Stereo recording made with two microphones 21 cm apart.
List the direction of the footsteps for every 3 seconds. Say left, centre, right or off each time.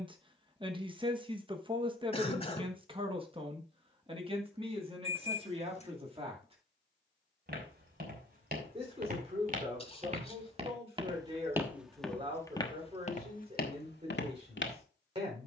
off, off, right, right, left.